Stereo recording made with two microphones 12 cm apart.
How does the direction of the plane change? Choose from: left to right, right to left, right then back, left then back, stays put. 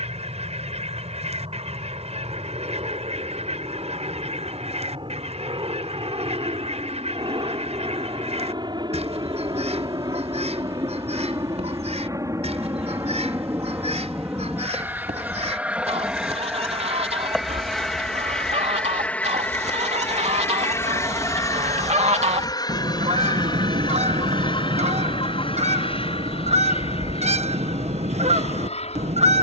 right to left.